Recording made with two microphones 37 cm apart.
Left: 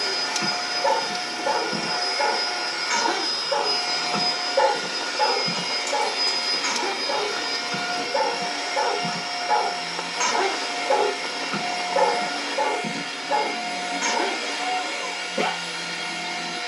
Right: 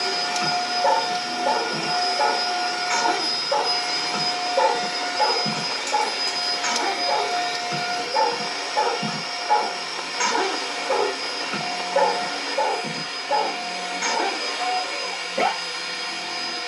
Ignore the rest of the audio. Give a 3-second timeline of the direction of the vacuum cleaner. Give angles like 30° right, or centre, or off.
50° right, 20° right, 20° left, 30° left, 30° left, 30° left.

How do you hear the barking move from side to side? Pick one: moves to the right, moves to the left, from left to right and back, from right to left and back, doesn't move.
from left to right and back.